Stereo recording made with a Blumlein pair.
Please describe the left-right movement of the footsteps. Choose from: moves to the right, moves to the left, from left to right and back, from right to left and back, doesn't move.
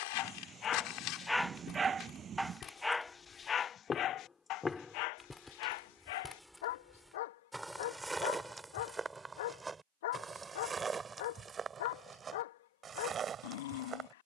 moves to the right.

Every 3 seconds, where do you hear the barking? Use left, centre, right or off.
centre, left, left, left, left.